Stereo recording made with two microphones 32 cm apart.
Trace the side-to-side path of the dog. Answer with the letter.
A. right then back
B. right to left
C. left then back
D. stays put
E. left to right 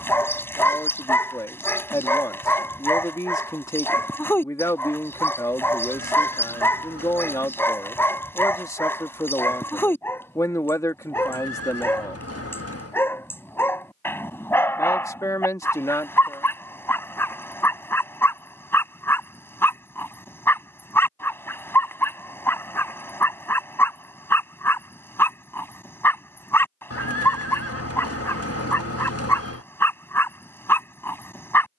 D.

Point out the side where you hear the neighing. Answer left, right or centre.
left.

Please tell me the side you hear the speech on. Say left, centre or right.
centre.